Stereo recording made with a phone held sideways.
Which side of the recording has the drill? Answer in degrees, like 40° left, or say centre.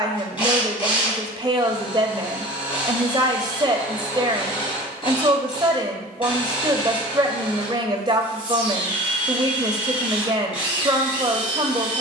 40° left.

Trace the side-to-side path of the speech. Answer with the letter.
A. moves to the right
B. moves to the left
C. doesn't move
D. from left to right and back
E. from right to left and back
C.